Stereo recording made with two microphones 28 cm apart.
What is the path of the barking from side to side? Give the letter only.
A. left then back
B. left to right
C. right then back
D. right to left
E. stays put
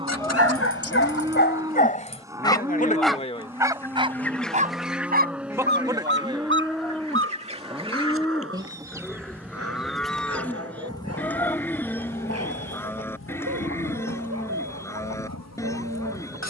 B.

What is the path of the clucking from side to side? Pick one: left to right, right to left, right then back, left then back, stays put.
right then back.